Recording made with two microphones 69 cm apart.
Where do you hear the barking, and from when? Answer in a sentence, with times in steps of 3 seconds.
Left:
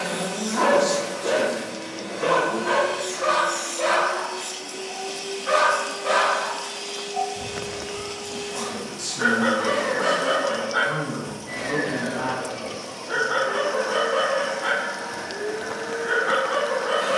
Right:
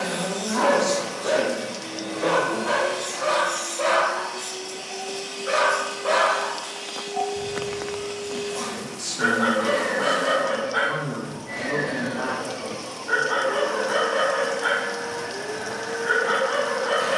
You can hear the barking on the left from 0 s, in the centre from 6 s and on the right from 9 s.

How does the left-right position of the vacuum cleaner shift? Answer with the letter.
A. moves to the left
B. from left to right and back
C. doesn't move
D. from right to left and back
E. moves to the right
D.